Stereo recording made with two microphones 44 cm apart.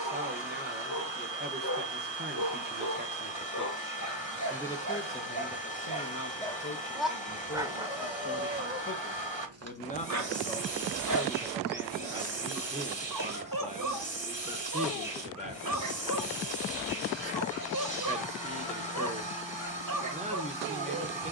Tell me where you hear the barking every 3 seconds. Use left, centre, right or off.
left, left, centre, right, right, right, right.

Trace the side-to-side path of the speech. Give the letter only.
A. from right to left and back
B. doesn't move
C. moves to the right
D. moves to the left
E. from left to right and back
A.